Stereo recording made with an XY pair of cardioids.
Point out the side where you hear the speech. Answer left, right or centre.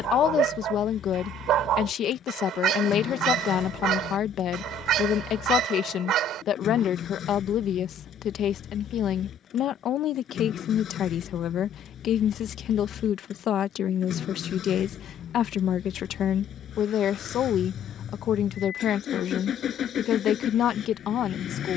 left.